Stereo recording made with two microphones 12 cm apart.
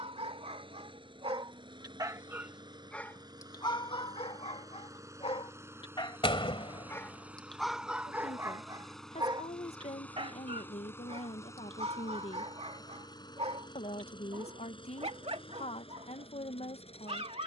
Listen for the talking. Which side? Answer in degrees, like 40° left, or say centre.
60° left.